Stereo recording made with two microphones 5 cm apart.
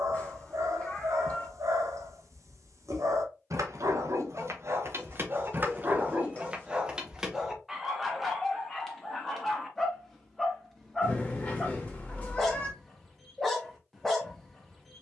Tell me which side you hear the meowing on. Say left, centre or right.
left.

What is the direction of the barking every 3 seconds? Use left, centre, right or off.
right, right, centre, centre, centre.